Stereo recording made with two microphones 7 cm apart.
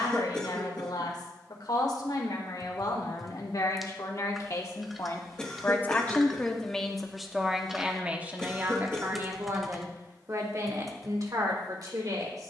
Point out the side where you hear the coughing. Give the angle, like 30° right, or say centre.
10° left.